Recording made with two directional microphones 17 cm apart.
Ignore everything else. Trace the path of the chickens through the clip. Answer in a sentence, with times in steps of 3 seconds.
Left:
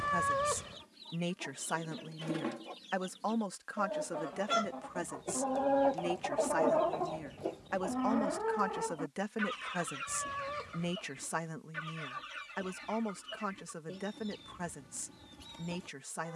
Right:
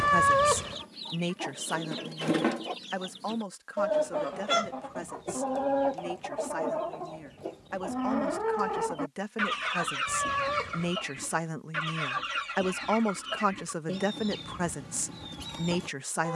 You can hear the chickens on the right from 0 s, in the centre from 6 s and on the right from 9 s.